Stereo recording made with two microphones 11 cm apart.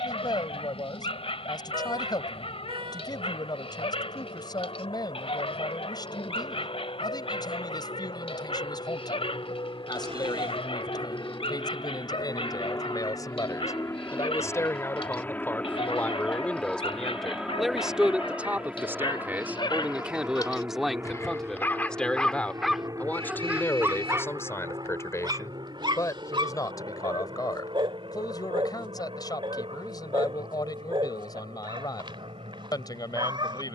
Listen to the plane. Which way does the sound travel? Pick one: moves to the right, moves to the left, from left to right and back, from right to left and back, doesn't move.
moves to the right.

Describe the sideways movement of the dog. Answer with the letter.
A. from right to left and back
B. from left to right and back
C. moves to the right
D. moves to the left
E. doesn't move
C.